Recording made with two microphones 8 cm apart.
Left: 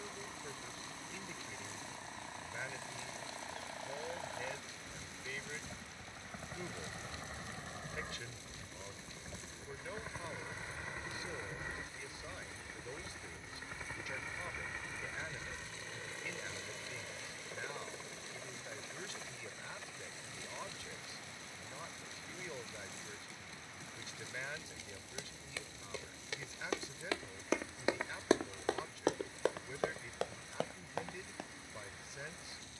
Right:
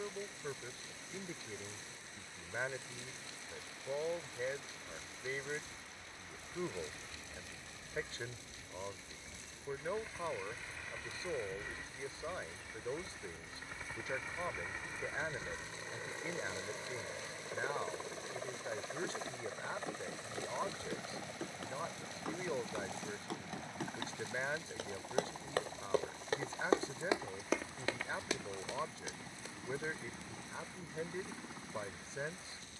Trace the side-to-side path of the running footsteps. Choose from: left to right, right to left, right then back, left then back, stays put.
right to left.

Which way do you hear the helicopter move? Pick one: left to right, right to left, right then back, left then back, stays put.
left to right.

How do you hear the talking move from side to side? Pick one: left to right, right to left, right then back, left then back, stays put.
stays put.